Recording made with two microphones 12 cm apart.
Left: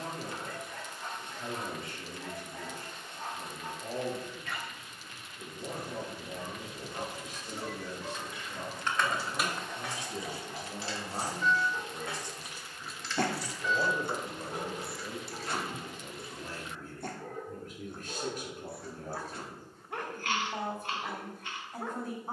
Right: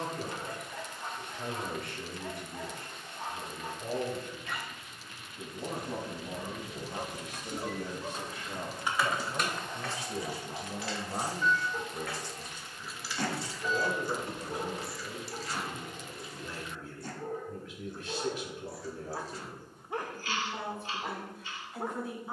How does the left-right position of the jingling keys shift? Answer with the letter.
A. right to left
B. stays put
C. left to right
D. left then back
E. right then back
D.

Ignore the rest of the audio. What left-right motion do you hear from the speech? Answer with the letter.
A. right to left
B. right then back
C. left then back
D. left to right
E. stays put
A.